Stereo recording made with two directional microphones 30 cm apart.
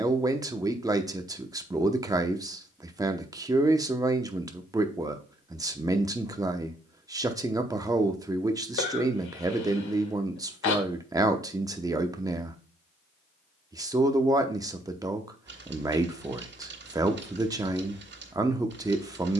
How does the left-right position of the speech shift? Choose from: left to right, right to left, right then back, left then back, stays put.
stays put.